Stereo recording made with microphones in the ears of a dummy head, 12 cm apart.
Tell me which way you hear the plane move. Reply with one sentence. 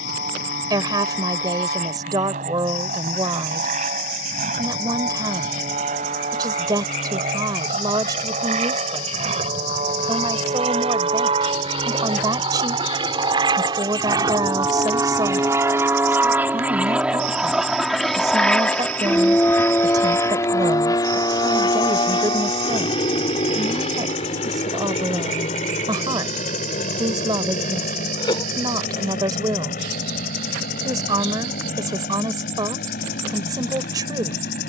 You can hear the plane travel towards the left.